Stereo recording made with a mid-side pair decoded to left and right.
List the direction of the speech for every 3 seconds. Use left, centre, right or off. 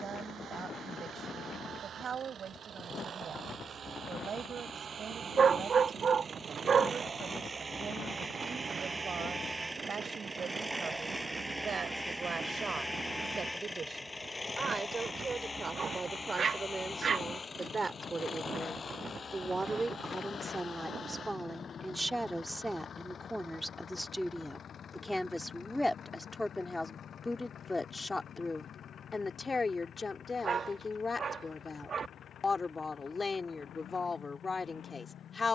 right, right, right, right, right, right, right, centre, centre, left, left, left.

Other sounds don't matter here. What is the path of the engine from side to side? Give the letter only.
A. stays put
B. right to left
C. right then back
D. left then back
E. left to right
B.